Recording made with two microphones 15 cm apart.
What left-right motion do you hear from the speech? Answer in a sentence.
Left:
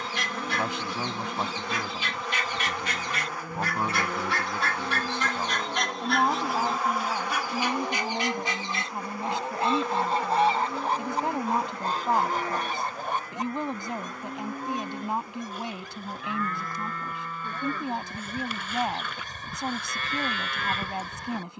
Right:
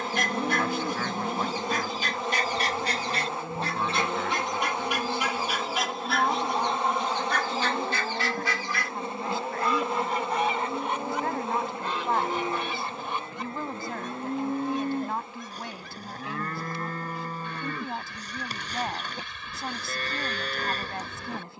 You can hear the speech stay put.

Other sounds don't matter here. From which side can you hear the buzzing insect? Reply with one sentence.
You can hear the buzzing insect on the right.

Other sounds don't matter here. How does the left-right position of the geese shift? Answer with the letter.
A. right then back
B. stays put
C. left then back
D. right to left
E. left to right
D.